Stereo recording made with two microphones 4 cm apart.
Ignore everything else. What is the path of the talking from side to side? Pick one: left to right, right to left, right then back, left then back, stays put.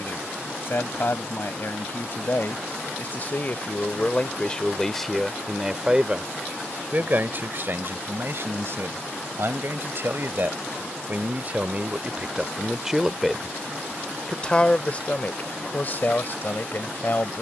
right then back.